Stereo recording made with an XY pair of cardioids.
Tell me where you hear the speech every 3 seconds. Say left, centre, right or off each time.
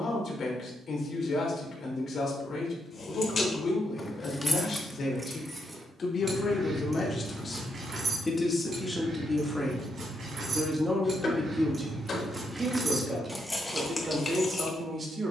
left, left, left, centre, right.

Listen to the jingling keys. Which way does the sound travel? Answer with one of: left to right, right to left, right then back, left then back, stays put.
right then back.